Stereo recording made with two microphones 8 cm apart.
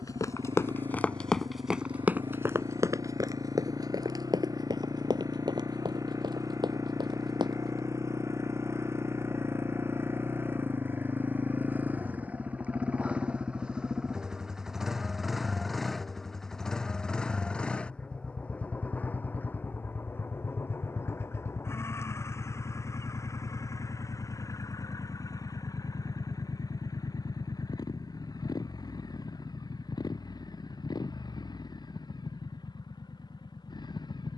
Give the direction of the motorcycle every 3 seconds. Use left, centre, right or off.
right, right, right, right, centre, centre, left, left, left, left, left, left.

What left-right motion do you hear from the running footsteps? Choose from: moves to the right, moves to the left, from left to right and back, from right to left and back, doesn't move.
moves to the right.